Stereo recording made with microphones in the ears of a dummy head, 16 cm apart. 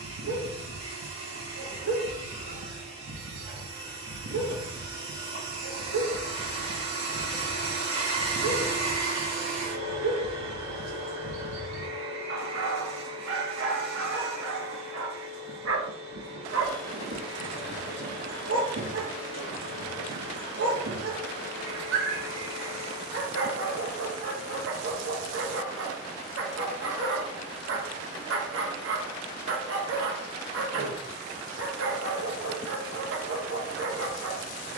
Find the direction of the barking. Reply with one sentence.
You can hear the barking on the right.